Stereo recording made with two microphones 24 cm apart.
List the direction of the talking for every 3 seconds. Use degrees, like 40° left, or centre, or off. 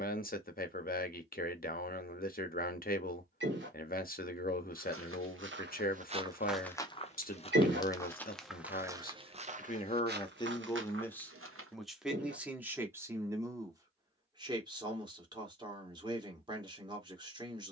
40° left, 40° left, 40° left, 20° left, 10° right, 20° right.